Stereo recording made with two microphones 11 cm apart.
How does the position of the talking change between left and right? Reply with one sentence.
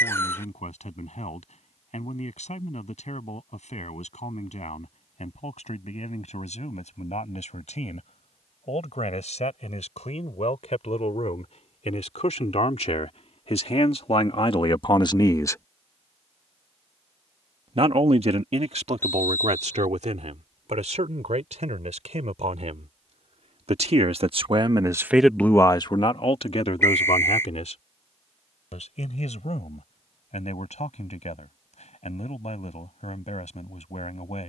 In this clip you hear the talking go right and come back.